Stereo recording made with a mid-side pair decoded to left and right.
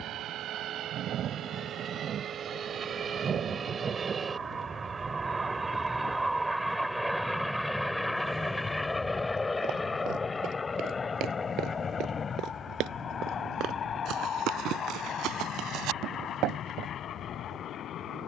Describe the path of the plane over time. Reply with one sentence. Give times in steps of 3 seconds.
In this clip you hear the plane on the right from 0 s, in the centre from 6 s and on the left from 9 s.